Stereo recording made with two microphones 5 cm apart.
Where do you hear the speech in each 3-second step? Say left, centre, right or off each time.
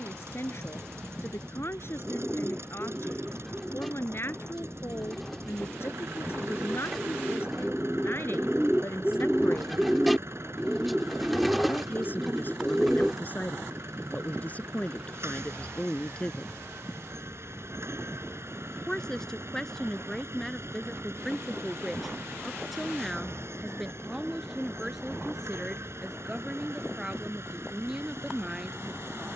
left, left, left, left, left, left, centre, centre, centre, centre.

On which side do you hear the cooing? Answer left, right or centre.
centre.